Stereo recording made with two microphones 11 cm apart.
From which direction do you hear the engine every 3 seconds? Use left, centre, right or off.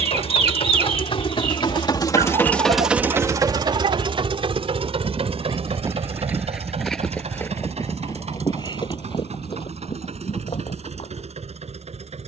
left, right, right, right.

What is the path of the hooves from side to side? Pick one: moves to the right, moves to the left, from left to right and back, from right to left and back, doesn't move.
moves to the left.